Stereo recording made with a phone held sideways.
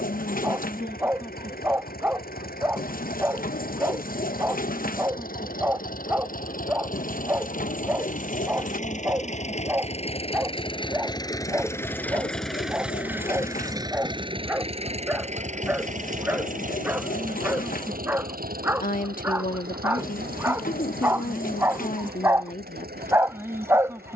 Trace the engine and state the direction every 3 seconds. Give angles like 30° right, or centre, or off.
70° left, 70° left, 60° left, 30° left, 20° right, 60° right, 70° right, 80° right.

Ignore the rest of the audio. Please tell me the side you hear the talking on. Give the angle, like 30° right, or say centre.
60° left.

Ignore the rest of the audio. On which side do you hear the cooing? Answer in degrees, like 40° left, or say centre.
60° left.